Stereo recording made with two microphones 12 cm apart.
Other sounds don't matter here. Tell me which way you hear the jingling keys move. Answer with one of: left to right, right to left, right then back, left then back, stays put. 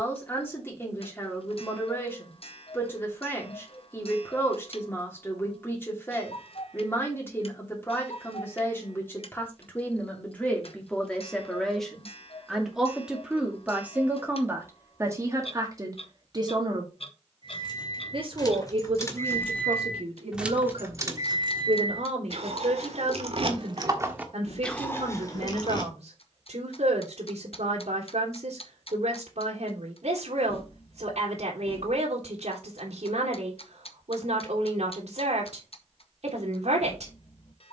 right then back.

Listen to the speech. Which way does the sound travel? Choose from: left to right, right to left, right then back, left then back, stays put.
left to right.